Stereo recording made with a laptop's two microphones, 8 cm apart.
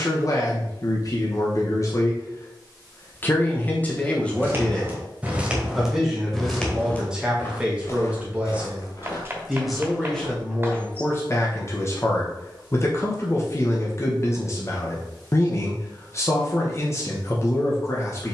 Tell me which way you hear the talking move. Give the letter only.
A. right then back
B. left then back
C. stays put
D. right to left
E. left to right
A.